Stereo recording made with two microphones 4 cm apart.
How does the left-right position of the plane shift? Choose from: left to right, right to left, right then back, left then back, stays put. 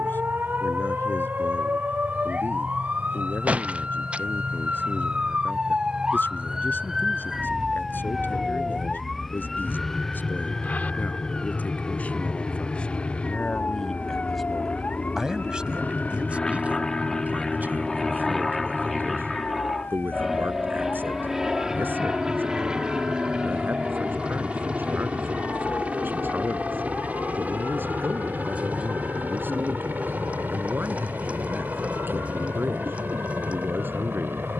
left to right.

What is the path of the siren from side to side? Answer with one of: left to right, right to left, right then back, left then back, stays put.
right to left.